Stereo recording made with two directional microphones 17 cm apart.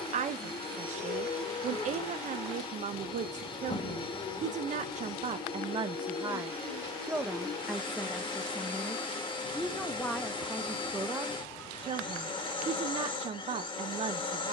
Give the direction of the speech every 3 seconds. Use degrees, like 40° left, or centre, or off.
40° right, 40° right, centre, 10° right, 40° right.